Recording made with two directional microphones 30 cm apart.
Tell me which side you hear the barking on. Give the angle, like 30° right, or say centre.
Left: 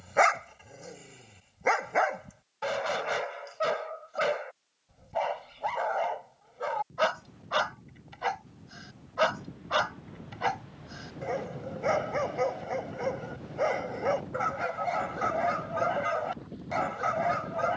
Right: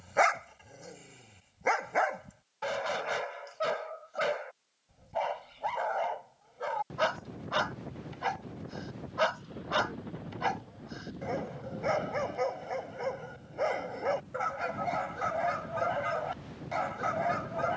10° left.